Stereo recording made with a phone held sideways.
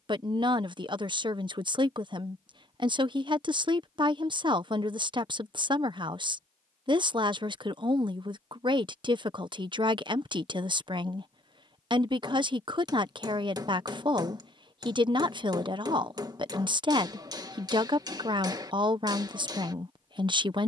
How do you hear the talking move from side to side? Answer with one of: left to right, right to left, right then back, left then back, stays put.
stays put.